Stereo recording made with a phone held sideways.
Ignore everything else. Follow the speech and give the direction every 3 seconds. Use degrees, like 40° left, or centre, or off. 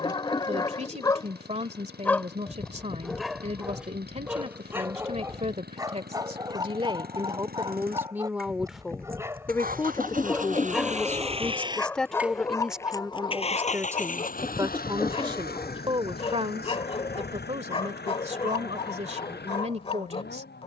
40° right, 40° right, 20° right, 20° left, 10° right, 40° right, 40° right.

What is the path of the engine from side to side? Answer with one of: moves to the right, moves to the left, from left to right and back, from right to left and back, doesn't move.
moves to the left.